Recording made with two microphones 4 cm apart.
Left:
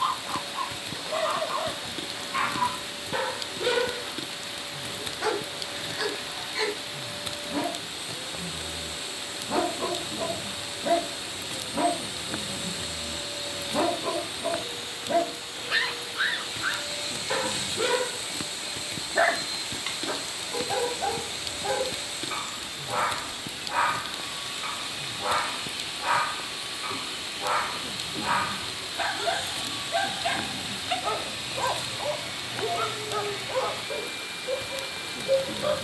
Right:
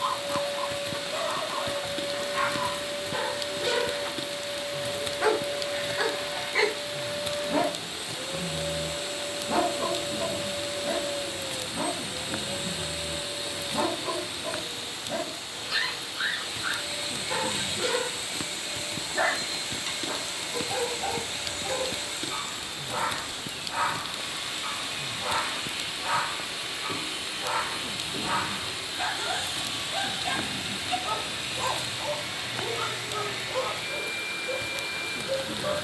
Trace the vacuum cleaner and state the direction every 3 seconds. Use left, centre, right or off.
right, right, right, right, centre, centre, right, right, right, right, right, right.